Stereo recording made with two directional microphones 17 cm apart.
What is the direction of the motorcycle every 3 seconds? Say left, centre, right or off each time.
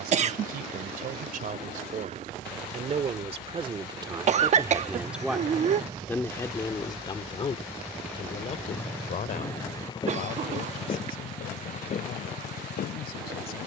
right, right, centre, left, left.